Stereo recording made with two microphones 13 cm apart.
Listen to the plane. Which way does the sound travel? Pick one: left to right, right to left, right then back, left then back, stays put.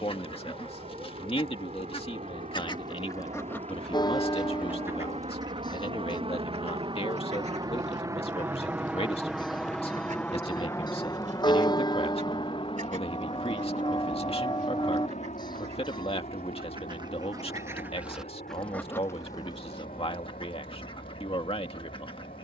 right to left.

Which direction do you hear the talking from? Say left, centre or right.
left.